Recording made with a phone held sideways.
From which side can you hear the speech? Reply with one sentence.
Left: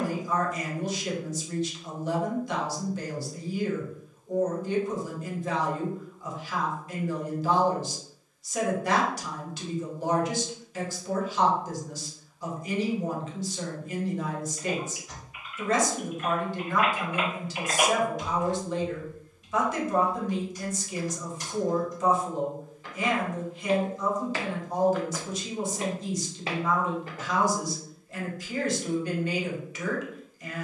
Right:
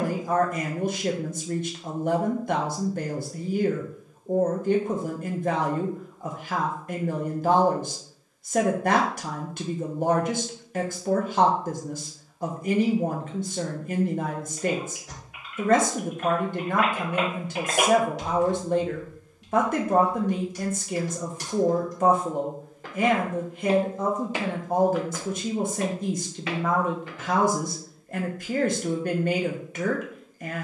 You can hear the speech on the right.